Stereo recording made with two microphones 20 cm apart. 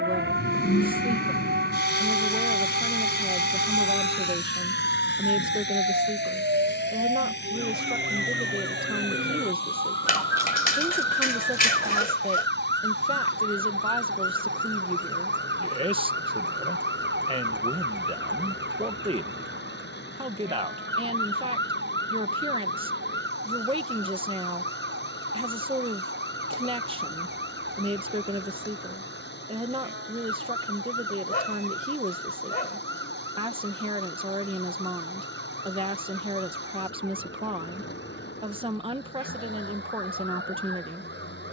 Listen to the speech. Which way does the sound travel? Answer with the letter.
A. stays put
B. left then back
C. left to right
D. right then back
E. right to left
A.